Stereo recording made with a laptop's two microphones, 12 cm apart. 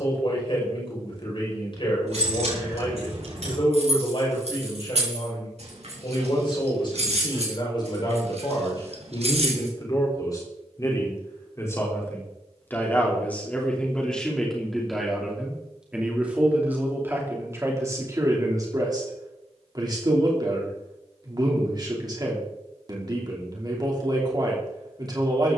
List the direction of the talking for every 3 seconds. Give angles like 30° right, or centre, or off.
50° left, 50° left, 40° left, 30° left, 10° left, 10° right, 30° right, 40° right, 40° right.